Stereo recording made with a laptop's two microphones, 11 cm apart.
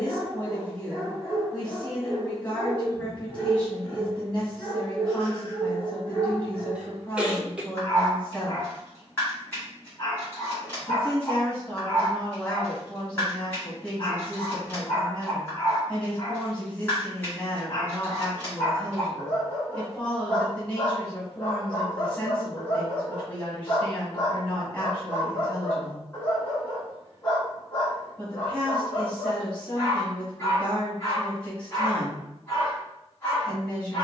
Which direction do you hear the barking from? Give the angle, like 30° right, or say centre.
20° left.